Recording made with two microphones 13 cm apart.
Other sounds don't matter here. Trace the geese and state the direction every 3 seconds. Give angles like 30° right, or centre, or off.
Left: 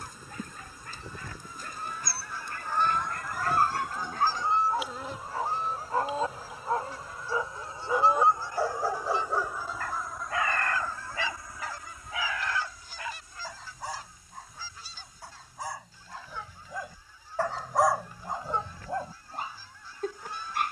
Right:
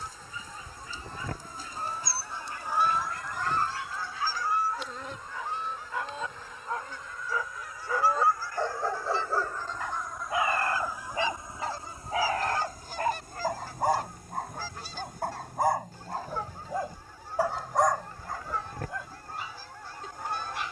40° right, 20° left, 30° left, 10° right, 60° right, 70° right, 70° right.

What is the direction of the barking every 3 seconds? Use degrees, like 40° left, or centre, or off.
60° left, 50° left, 20° left, 20° right, 50° right, 40° right, 40° left.